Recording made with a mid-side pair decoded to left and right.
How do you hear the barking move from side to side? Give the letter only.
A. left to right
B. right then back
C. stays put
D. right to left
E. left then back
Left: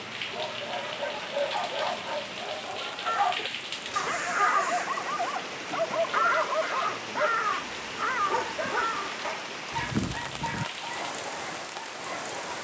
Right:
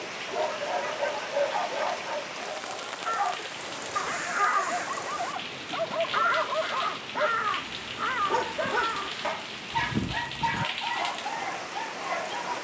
E.